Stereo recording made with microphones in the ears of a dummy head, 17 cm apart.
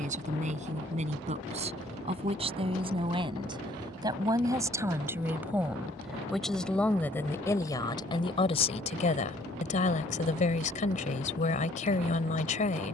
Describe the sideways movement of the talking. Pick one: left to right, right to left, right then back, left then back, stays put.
right to left.